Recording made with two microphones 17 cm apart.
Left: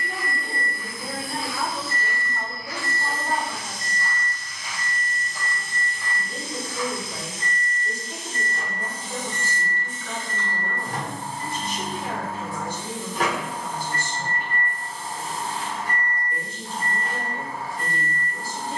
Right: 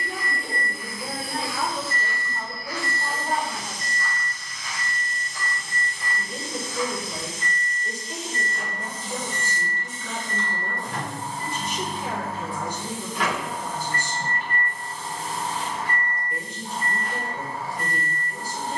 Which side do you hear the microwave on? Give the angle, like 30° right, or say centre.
40° left.